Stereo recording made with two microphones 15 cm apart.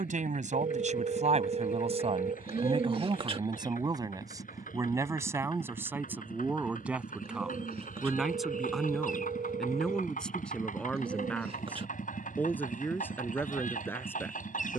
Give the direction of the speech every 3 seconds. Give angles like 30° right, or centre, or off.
50° right, 20° right, 10° right, 10° left, 10° left.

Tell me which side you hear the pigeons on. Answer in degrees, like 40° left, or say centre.
40° right.